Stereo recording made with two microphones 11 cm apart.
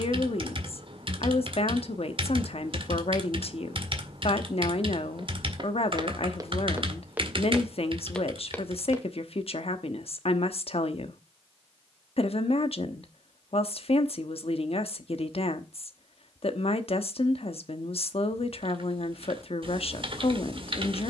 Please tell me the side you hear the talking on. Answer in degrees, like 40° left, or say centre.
60° left.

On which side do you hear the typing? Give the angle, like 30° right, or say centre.
50° right.